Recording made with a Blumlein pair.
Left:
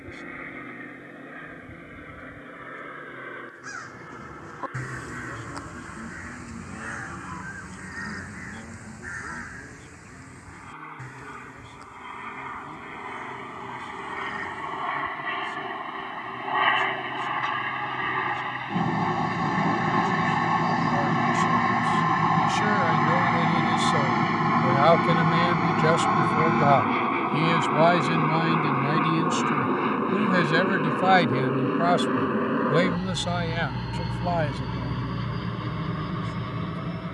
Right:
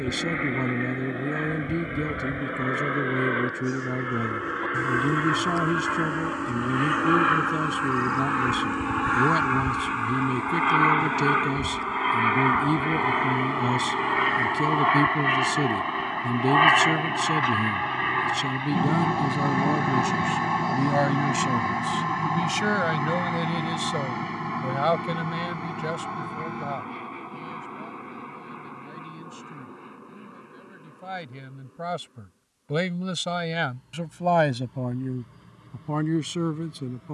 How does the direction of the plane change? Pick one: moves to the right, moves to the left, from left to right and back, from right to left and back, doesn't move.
moves to the left.